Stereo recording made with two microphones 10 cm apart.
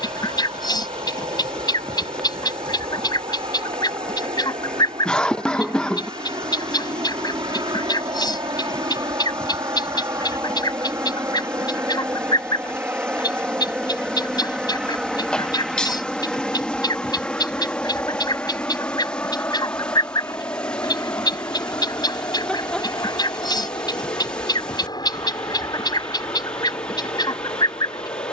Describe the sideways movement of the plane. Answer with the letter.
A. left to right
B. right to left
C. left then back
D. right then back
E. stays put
B.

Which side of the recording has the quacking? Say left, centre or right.
left.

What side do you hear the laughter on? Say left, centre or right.
centre.